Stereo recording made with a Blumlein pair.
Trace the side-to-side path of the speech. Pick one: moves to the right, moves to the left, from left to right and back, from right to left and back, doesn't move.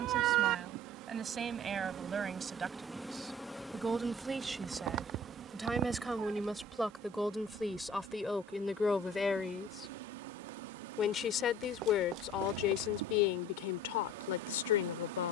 moves to the left.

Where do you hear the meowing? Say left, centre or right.
right.